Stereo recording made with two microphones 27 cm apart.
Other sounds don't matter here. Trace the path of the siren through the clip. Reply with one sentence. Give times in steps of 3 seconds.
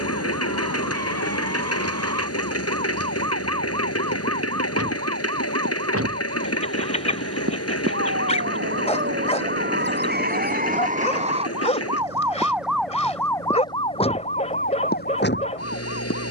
In this clip you hear the siren on the right from 0 s, in the centre from 12 s and on the left from 15 s.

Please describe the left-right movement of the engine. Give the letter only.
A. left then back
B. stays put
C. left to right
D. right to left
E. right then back
B.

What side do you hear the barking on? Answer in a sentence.
In this clip you hear the barking on the left.